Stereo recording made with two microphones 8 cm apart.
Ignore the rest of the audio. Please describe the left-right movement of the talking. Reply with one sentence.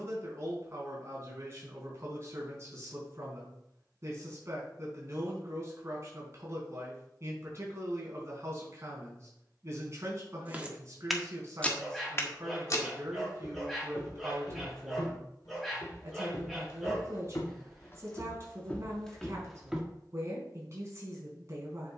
In this clip you hear the talking stay put.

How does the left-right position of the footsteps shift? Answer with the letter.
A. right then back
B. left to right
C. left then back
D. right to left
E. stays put
C.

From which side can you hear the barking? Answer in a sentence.
In this clip you hear the barking in the centre.